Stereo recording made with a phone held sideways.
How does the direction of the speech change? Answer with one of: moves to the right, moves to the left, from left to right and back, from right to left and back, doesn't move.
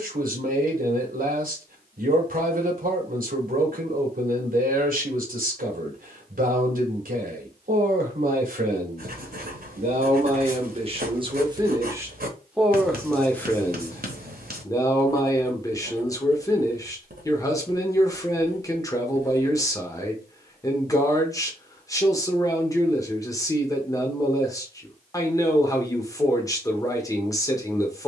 moves to the left.